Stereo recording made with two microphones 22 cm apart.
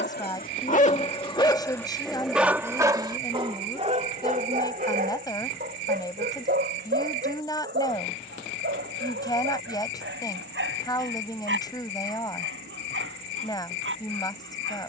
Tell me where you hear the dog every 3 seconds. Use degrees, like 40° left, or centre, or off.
20° left, 40° right, 50° right, 60° right, 60° right.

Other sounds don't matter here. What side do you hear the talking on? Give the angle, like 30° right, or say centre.
20° left.